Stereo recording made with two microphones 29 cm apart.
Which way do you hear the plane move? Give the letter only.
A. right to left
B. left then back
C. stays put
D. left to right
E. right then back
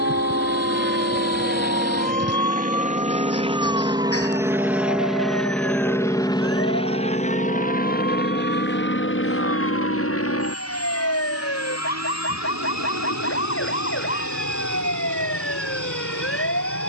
A.